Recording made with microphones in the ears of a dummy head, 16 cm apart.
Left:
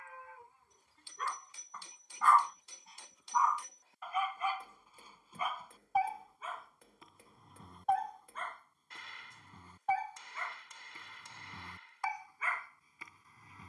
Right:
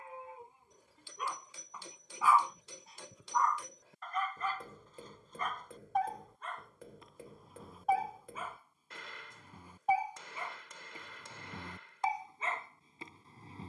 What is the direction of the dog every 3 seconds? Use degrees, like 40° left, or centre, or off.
10° right, 10° left, centre, 10° right, 20° right.